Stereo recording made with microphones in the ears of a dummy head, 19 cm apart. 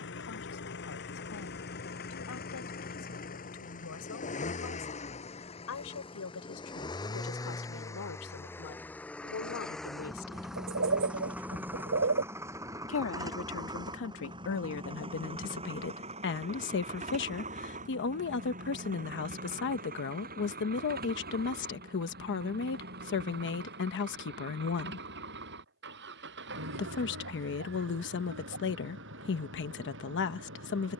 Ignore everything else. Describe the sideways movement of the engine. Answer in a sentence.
You can hear the engine move to the right.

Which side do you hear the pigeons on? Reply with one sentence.
In this clip you hear the pigeons on the right.